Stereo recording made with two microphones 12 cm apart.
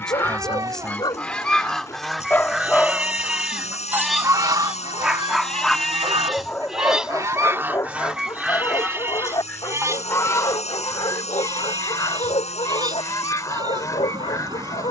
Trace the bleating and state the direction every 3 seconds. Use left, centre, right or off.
right, centre, centre, right, right.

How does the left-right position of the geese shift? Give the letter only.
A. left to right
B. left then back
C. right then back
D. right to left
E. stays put
C.